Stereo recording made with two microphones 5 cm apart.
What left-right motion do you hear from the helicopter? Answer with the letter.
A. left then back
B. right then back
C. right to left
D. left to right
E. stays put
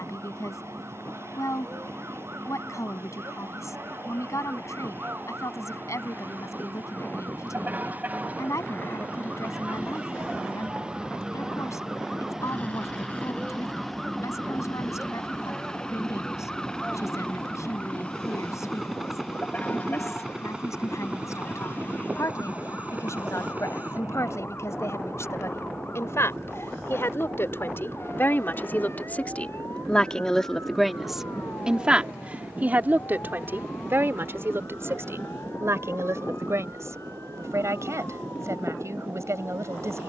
D.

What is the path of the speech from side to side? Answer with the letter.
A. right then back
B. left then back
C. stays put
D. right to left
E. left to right
E.